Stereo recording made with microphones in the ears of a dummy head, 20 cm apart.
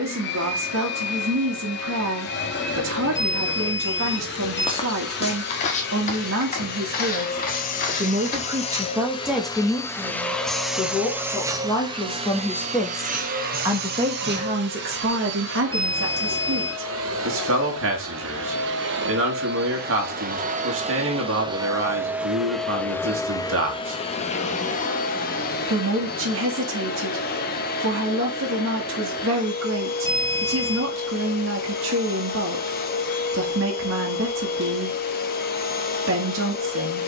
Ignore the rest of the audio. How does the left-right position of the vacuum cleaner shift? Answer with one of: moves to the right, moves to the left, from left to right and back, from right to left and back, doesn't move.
from left to right and back.